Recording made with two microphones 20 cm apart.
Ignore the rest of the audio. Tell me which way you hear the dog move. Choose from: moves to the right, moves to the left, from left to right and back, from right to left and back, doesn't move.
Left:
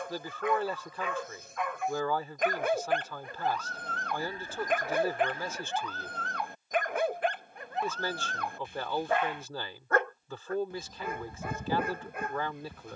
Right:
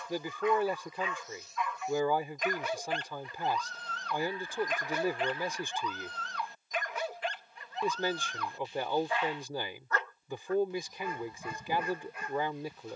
doesn't move.